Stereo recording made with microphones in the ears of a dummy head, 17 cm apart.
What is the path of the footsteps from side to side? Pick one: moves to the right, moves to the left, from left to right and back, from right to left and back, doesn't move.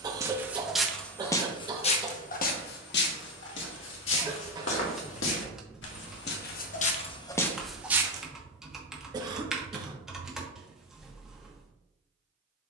from right to left and back.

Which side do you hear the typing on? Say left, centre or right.
centre.